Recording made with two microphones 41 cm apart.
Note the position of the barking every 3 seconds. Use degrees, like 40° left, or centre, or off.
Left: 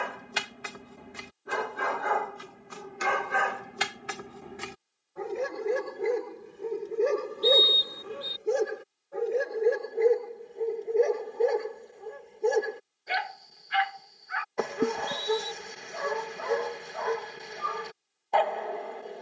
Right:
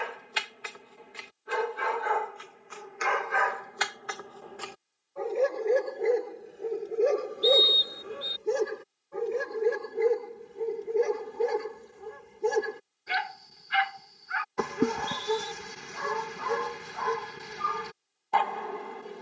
60° left, 40° left, 10° left, 20° right, 20° right, 20° right, 20° right.